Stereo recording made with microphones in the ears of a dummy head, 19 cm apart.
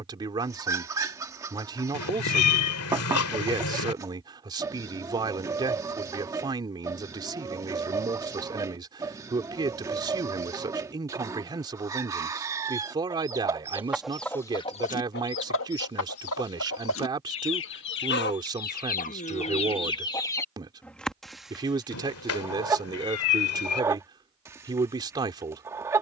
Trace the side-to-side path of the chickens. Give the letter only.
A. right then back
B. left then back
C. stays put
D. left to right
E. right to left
B.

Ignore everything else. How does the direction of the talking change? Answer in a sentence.
You can hear the talking stay put.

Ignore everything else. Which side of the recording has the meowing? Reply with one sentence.
In this clip you hear the meowing on the left.